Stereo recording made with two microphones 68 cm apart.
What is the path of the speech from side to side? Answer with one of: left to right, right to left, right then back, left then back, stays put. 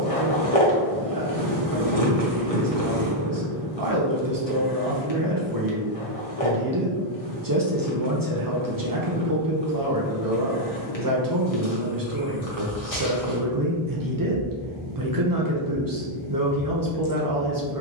stays put.